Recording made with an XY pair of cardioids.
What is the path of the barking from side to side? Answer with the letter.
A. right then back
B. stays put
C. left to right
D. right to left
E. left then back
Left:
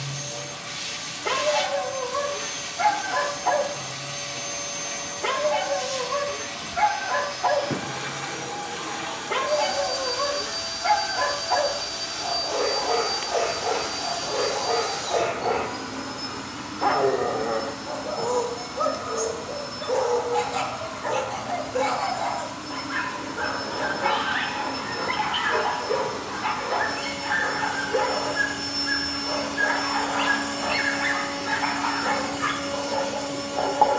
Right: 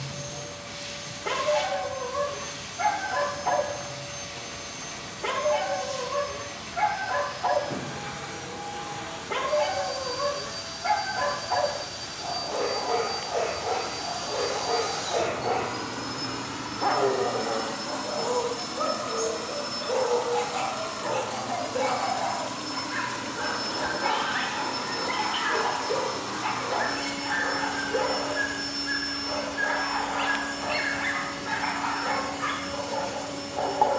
B.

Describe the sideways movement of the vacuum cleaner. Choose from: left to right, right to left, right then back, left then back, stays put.
right then back.